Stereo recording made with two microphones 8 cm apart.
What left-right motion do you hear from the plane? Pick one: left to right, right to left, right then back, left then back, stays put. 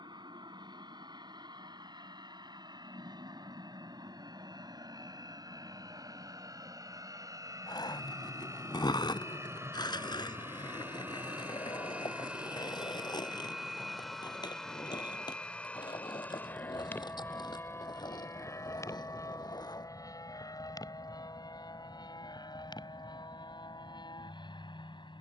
right to left.